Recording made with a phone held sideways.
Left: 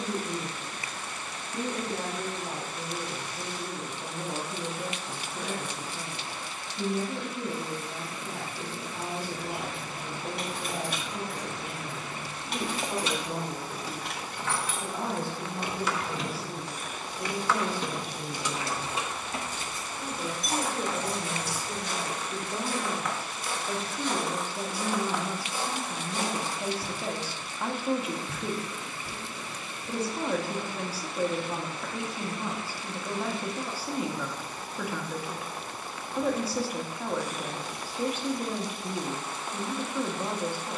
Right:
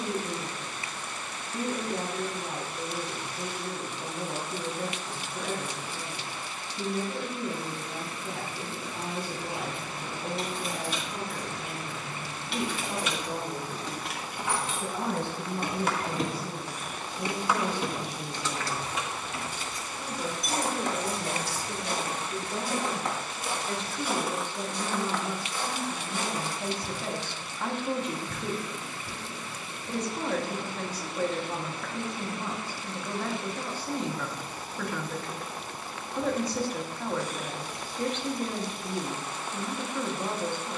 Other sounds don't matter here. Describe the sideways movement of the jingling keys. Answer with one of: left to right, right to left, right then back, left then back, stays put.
right then back.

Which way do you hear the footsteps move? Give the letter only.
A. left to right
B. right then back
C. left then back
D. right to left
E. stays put
D.